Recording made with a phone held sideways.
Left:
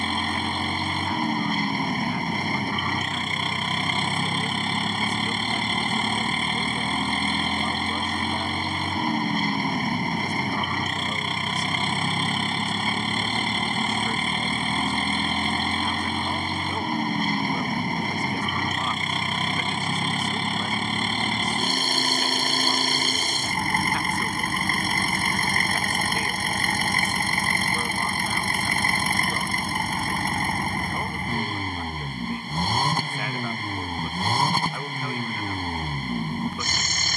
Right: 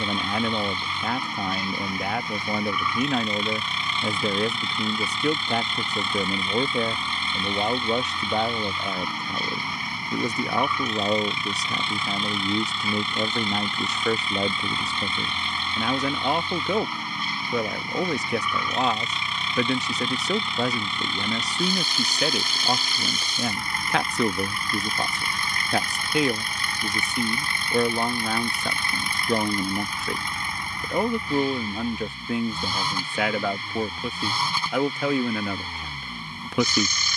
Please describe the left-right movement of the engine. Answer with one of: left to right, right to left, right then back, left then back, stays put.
stays put.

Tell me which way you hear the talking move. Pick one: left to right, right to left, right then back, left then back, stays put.
stays put.